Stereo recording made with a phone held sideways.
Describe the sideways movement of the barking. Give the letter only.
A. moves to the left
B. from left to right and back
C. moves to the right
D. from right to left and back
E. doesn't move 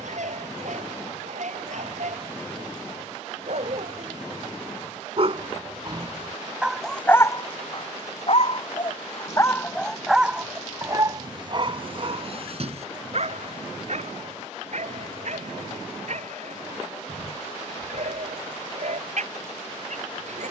D.